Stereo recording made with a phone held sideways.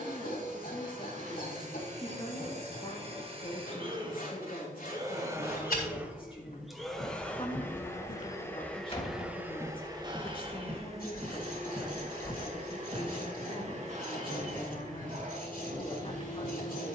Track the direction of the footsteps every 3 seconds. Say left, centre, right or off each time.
off, left, left, centre, right, right.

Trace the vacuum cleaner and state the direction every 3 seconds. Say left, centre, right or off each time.
right, right, centre, right, right, right.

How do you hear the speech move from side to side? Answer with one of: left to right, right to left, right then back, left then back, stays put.
stays put.